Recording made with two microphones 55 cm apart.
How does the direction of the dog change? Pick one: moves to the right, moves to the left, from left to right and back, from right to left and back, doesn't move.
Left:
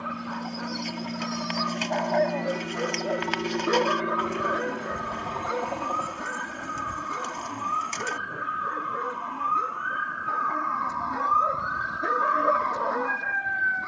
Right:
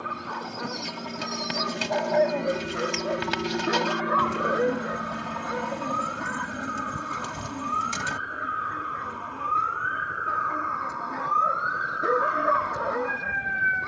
from right to left and back.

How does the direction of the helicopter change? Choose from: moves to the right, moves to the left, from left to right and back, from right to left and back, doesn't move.
moves to the right.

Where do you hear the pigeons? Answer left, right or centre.
right.